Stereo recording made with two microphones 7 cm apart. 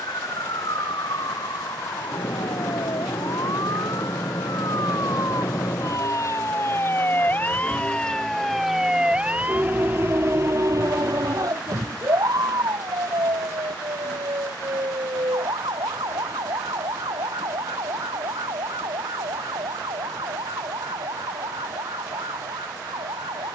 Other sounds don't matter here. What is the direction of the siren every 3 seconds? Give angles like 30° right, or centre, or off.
70° left, 50° left, 20° left, 40° right, 60° right, 70° right, 80° right, 80° right.